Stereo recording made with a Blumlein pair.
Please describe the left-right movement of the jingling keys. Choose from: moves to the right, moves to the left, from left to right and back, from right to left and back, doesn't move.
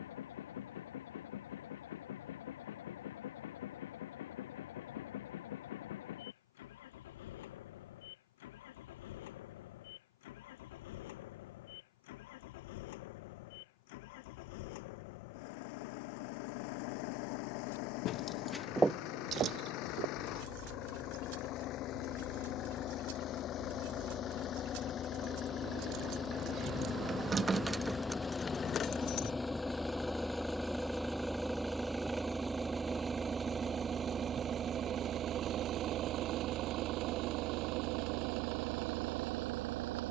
from left to right and back.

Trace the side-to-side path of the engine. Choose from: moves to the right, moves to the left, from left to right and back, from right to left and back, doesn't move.
moves to the right.